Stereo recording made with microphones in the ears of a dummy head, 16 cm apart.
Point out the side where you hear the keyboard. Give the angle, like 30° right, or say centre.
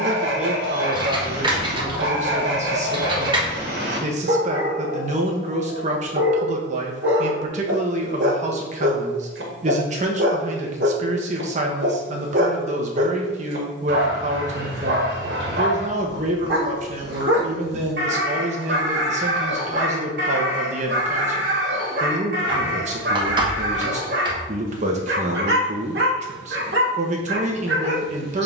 30° right.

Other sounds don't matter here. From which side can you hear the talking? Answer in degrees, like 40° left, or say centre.
40° right.